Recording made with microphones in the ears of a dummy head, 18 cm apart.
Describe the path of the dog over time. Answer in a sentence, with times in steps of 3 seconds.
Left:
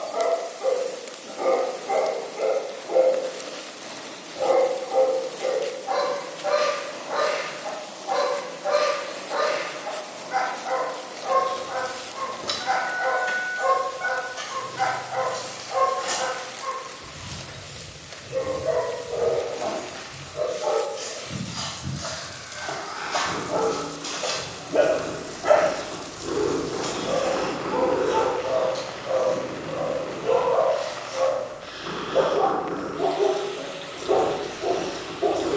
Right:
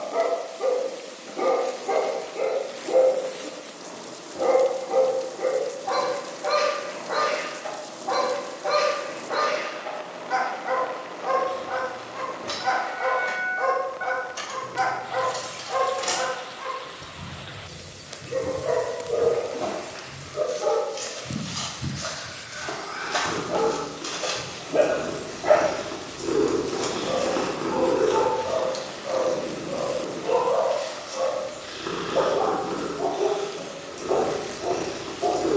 In this clip you hear the dog on the right from 0 s, in the centre from 24 s and on the left from 27 s.